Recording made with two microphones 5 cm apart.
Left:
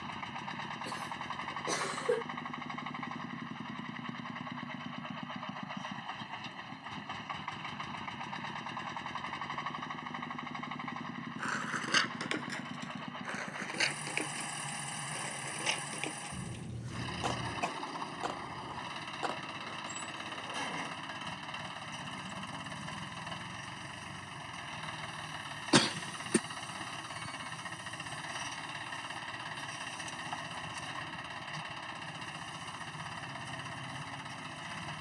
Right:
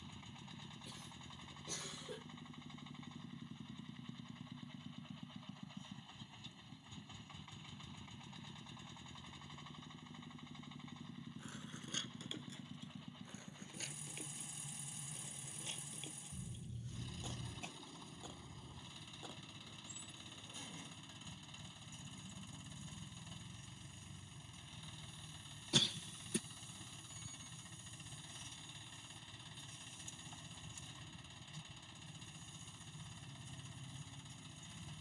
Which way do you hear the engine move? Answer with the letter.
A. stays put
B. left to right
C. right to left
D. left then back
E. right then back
A.